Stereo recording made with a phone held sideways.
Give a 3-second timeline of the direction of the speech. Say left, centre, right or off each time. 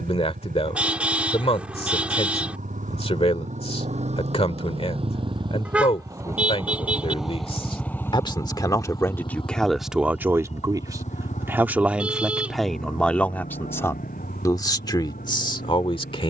left, left, left, centre, centre, left.